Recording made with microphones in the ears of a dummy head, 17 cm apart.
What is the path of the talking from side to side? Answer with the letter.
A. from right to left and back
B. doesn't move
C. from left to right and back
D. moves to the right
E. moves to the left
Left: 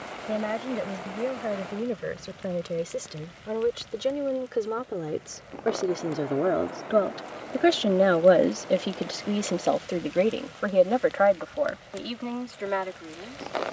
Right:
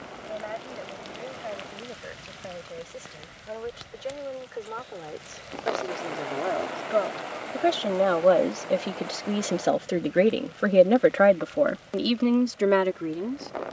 D.